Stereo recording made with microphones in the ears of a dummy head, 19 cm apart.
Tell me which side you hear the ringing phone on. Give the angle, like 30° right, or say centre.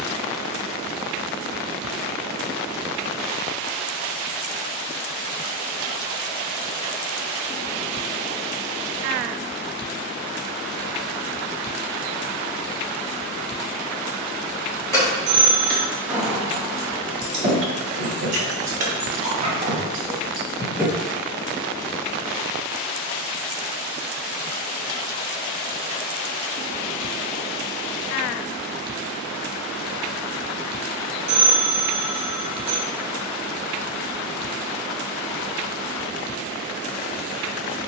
30° right.